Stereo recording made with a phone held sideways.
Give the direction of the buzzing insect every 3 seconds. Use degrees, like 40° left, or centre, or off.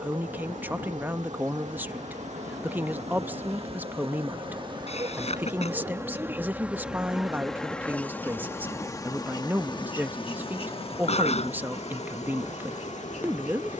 60° right, 40° right, centre, 40° left, 60° left.